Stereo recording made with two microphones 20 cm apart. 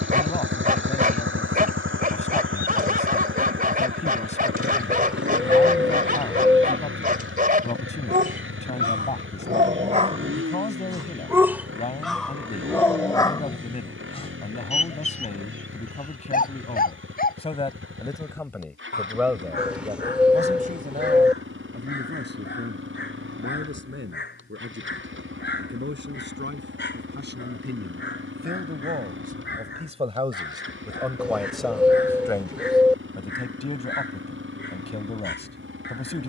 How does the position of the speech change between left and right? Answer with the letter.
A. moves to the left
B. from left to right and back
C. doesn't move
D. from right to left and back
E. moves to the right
B.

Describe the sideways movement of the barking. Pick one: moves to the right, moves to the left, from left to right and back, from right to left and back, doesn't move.
moves to the left.